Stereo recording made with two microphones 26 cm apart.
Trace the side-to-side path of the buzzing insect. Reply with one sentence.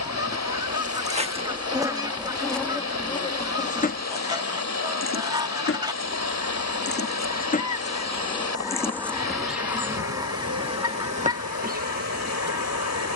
In this clip you hear the buzzing insect move from right to left and back again.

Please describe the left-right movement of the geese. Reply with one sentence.
In this clip you hear the geese stay in one place.